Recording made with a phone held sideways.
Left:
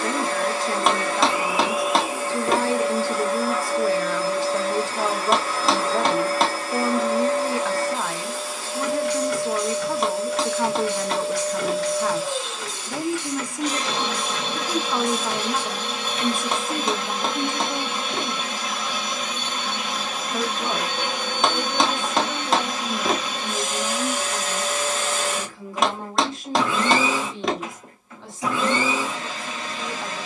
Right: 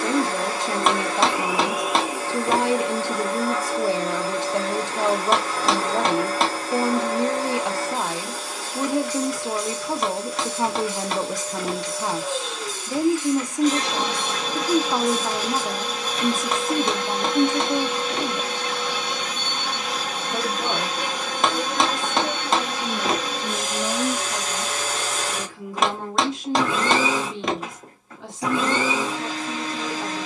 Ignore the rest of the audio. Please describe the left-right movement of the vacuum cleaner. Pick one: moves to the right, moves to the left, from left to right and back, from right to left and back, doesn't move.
doesn't move.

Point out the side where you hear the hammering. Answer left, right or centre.
centre.